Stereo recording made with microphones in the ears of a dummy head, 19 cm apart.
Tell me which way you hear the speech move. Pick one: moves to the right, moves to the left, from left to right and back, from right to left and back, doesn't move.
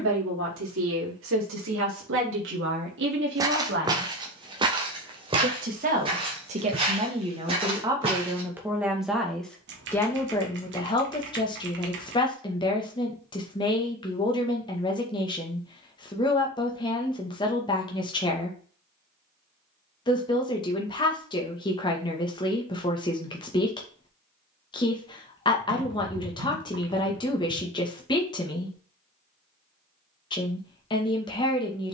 moves to the left.